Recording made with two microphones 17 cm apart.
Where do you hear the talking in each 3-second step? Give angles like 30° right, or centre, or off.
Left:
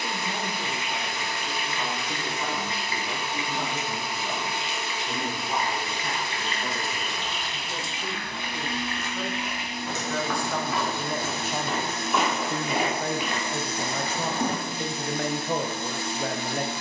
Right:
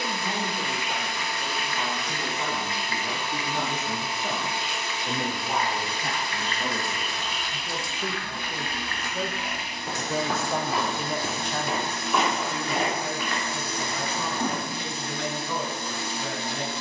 70° right, 60° right, 50° right, 20° right, 50° left, 50° left.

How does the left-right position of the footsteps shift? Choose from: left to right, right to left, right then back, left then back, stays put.
right then back.